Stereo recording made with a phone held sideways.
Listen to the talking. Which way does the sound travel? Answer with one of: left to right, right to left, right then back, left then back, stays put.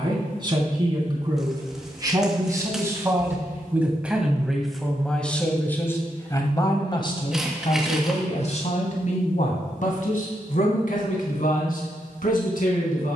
right to left.